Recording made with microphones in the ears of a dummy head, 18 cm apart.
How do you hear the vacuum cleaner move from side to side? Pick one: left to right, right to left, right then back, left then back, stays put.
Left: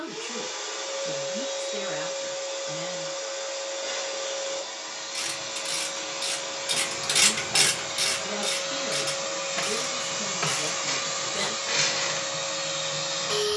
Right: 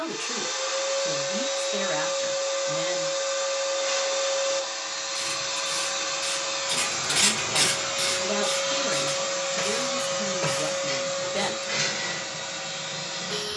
right to left.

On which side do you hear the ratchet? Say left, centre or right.
left.